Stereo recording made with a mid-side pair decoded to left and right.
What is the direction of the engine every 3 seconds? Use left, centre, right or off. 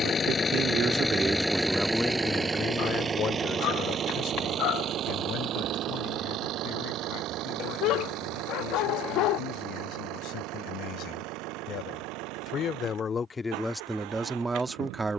centre, right, right, right, right.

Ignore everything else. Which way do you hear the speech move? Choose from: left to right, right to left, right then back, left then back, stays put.
left then back.